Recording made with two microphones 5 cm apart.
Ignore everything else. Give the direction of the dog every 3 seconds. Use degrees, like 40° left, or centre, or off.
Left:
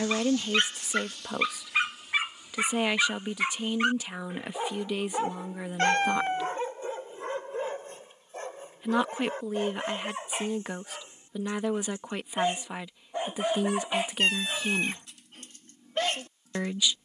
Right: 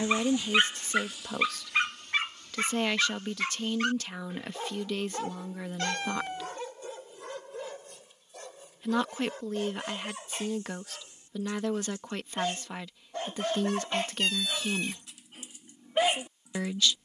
centre, 20° left, 30° left, 30° left, 10° left, 10° right.